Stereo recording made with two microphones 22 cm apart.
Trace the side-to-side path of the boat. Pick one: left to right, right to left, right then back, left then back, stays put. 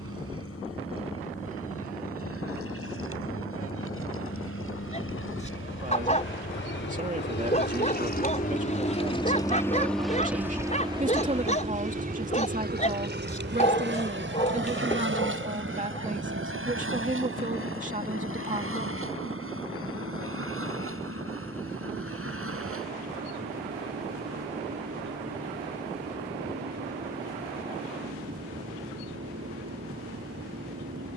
left to right.